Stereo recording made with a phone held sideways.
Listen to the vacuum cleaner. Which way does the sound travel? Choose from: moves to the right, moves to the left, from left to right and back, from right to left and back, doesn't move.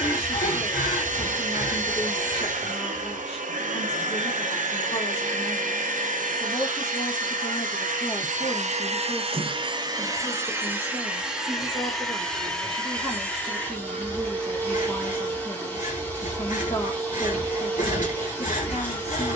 moves to the left.